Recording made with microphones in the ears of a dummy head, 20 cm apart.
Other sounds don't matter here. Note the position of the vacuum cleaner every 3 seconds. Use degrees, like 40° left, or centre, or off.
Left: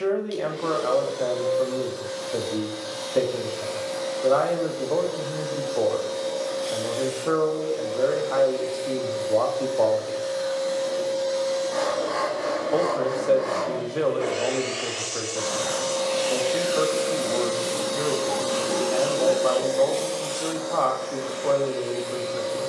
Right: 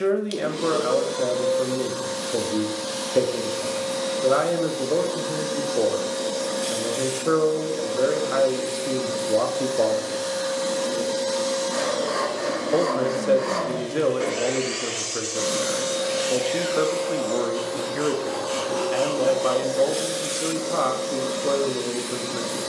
70° right, 70° right, 70° right, 70° right, 60° right, centre, centre, 60° right.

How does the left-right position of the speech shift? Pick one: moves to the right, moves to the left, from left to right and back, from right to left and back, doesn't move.
doesn't move.